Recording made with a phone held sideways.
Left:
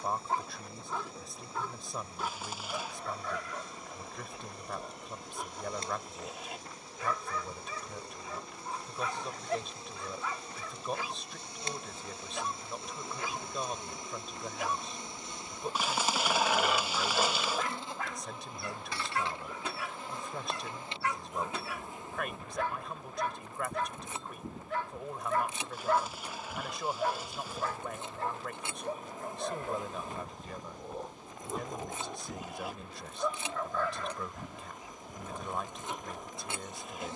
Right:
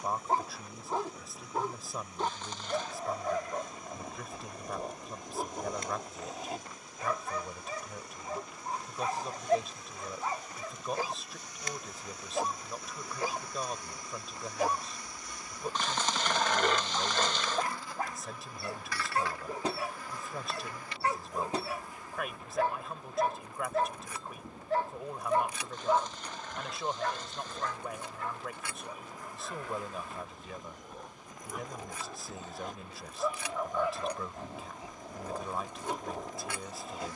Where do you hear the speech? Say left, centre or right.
centre.